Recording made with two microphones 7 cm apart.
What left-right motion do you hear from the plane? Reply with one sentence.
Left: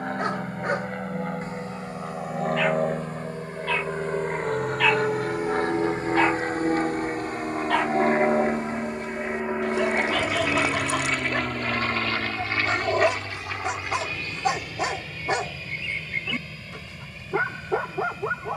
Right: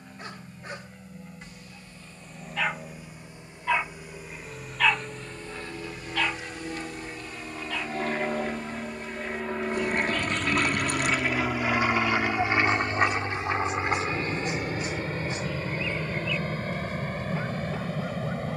You can hear the plane travel towards the right.